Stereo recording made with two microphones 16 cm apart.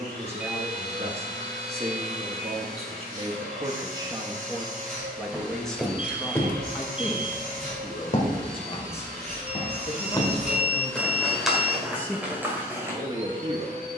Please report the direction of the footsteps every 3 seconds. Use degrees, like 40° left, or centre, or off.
off, centre, 40° left, 10° left, 10° right.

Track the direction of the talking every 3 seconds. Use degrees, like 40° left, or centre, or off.
40° right, 20° right, 30° left, 40° left, 20° right.